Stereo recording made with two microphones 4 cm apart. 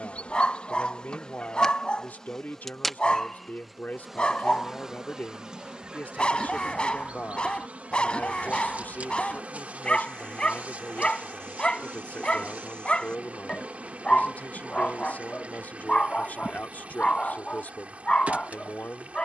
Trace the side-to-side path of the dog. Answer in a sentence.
You can hear the dog stay in one place.